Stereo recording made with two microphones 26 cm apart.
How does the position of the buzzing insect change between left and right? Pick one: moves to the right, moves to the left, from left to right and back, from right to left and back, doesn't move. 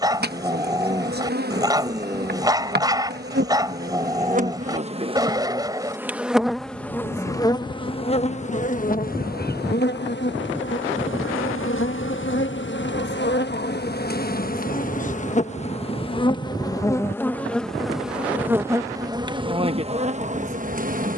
from right to left and back.